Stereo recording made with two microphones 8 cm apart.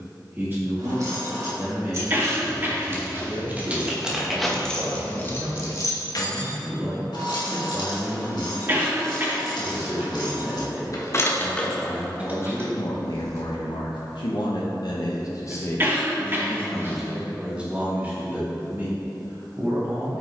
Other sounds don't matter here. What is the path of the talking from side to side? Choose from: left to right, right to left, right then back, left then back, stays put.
left then back.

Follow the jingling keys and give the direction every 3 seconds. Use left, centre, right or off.
right, centre, left, left, right, off, off.